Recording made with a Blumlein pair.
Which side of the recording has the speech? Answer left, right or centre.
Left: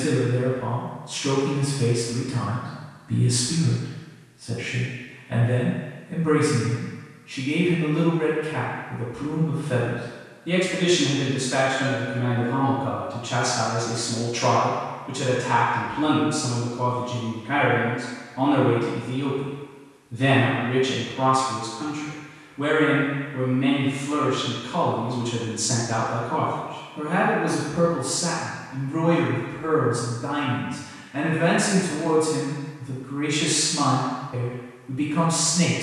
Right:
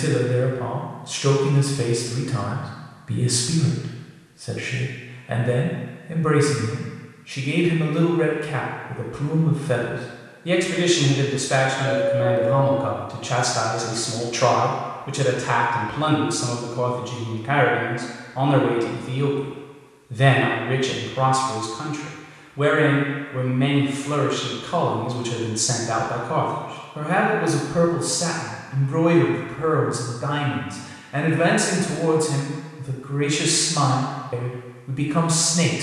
right.